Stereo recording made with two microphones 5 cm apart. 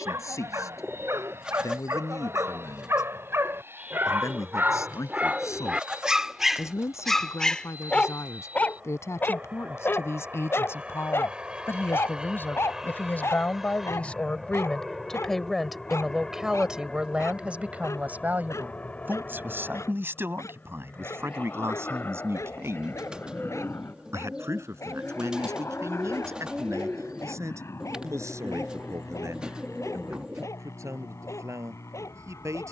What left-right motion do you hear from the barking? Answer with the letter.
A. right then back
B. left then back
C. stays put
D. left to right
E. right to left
E.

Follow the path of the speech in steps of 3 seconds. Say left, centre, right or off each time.
left, left, left, left, left, centre, right, right, right, right, right.